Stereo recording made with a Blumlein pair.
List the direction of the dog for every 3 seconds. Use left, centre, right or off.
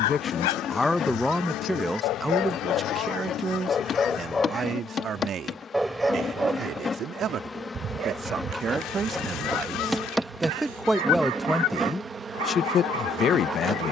left, centre, right, right, right.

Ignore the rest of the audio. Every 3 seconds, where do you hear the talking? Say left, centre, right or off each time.
centre, right, right, centre, left.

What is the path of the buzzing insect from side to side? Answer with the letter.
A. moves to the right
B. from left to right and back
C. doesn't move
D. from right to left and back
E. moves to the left
A.